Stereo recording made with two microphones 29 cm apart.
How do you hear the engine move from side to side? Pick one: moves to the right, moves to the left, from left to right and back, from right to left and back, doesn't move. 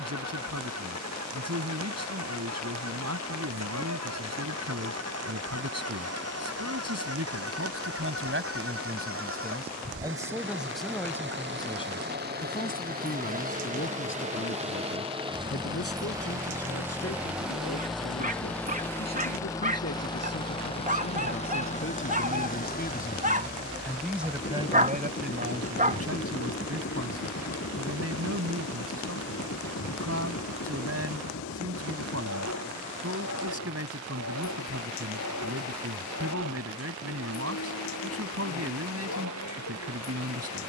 moves to the left.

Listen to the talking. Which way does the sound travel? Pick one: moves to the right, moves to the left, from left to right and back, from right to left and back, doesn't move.
from right to left and back.